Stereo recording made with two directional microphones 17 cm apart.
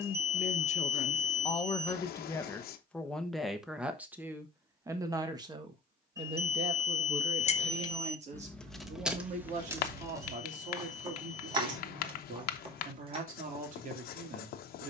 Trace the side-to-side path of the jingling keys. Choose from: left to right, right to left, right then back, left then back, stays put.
left to right.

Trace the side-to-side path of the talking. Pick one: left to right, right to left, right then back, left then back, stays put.
left to right.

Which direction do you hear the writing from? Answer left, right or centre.
left.